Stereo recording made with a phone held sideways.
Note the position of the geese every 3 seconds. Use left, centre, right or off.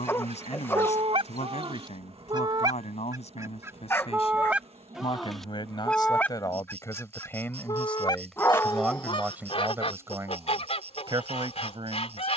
right, centre, left, left.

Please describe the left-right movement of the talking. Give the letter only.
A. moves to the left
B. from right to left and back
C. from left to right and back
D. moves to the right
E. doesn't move
D.